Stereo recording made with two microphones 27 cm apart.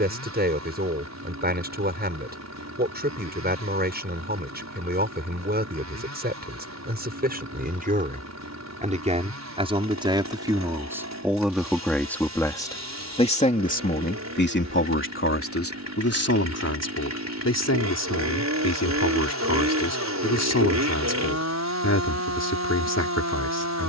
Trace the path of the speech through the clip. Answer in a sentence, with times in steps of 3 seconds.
In this clip you hear the speech on the right from 0 s, in the centre from 9 s and on the left from 12 s.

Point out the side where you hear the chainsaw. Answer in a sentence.
You can hear the chainsaw on the right.